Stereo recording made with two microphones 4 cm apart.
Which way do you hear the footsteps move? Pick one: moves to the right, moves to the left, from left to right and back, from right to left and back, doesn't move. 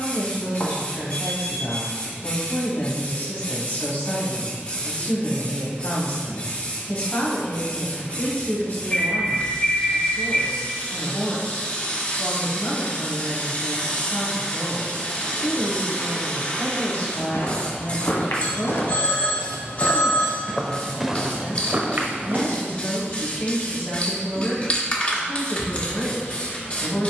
moves to the right.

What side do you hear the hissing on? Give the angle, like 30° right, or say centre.
30° left.